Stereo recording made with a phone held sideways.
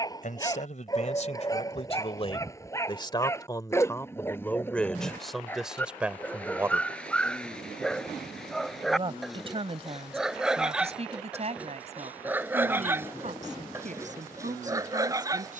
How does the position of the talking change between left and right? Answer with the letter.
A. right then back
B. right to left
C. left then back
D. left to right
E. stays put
D.